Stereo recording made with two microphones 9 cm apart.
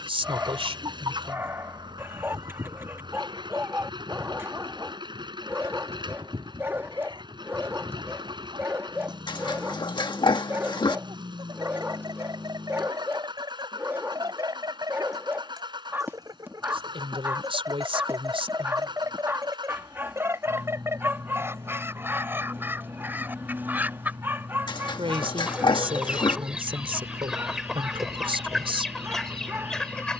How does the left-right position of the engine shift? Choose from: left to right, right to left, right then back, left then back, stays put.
stays put.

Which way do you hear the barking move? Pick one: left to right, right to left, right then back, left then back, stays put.
stays put.